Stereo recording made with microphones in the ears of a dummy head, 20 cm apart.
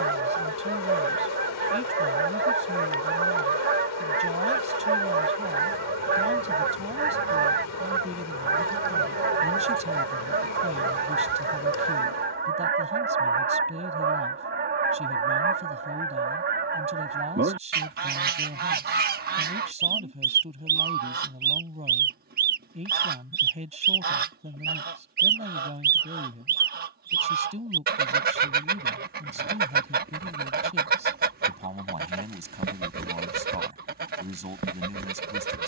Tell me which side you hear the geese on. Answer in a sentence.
You can hear the geese on the right.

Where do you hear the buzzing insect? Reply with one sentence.
In this clip you hear the buzzing insect on the left.